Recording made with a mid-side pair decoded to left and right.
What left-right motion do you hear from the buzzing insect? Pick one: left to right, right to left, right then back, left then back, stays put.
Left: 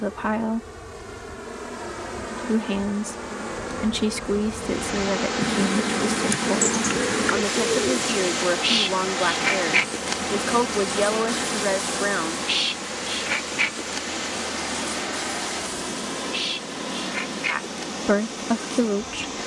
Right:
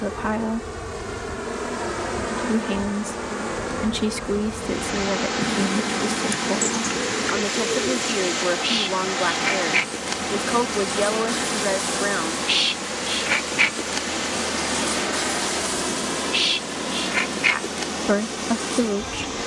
left then back.